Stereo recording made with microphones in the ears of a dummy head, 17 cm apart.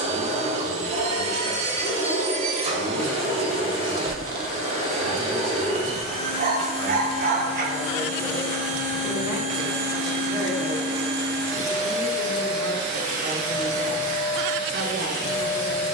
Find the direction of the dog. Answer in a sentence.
You can hear the dog on the right.